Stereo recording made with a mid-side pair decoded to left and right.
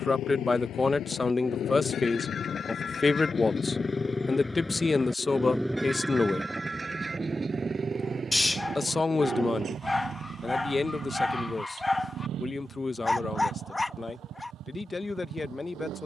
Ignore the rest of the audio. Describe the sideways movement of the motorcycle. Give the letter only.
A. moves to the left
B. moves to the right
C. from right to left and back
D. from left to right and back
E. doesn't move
B.